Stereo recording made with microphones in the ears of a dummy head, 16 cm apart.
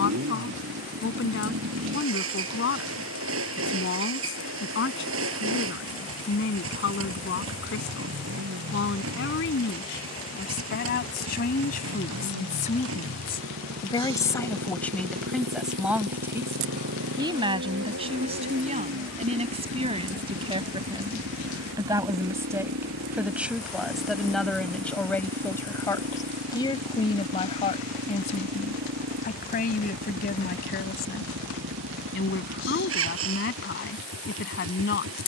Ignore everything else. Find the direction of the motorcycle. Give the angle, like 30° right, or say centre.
80° right.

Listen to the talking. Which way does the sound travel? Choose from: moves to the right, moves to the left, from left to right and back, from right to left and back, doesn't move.
from left to right and back.